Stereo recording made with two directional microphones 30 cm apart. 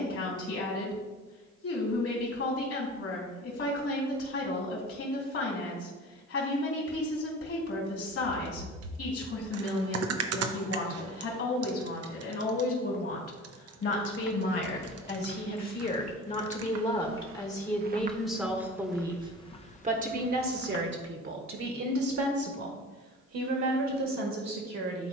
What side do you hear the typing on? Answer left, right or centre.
right.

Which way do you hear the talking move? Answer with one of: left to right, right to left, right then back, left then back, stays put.
left to right.